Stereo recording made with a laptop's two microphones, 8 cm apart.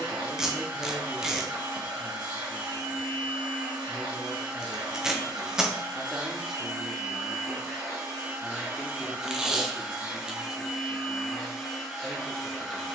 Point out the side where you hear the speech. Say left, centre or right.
centre.